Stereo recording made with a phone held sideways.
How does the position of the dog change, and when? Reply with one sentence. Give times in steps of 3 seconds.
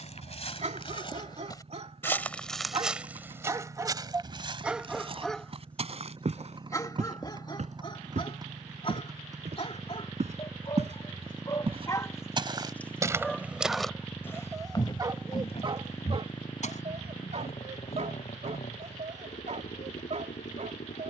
In this clip you hear the dog on the right from 0 s, in the centre from 3 s, on the left from 6 s, in the centre from 12 s and on the right from 15 s.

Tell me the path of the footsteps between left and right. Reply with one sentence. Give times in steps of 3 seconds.
You can hear the footsteps on the left from 0 s, on the right from 3 s, in the centre from 12 s, on the left from 15 s and not at all from 18 s.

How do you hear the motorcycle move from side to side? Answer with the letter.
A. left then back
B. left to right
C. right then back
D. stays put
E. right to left
E.